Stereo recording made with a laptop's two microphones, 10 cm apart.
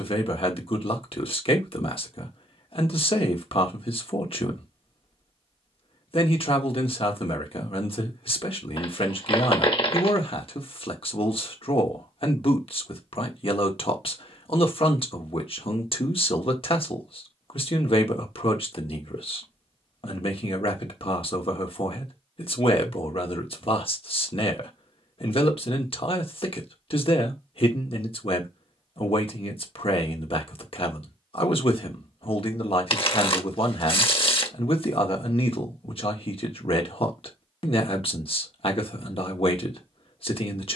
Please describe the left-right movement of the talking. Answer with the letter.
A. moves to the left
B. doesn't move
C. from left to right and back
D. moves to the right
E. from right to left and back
B.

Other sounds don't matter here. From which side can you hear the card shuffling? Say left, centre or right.
left.